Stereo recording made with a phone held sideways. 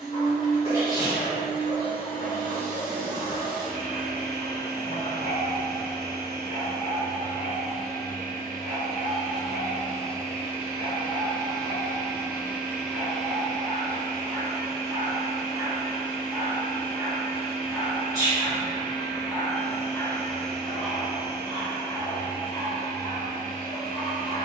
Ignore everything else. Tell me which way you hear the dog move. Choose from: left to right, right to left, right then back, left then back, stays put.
right then back.